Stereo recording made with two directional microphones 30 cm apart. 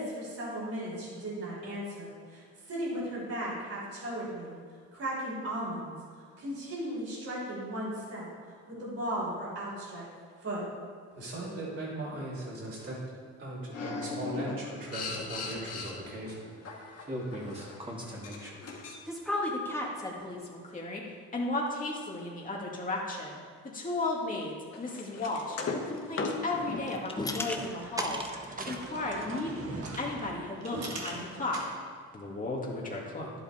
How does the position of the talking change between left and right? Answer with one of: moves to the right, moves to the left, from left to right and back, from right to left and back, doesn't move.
moves to the left.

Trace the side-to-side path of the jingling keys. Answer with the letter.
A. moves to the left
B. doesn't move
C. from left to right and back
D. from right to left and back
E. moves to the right
E.